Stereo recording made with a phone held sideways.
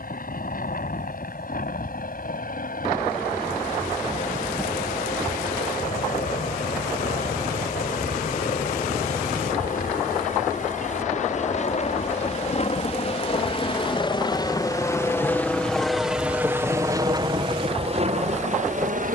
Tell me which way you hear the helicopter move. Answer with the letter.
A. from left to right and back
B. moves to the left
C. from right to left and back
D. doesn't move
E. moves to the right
E.